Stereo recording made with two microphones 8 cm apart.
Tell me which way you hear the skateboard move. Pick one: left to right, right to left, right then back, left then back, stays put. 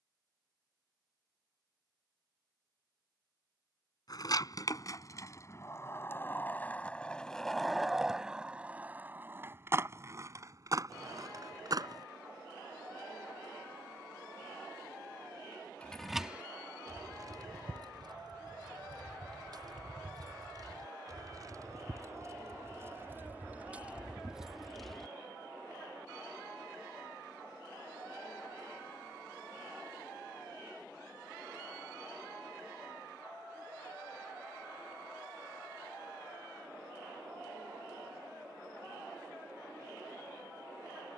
left to right.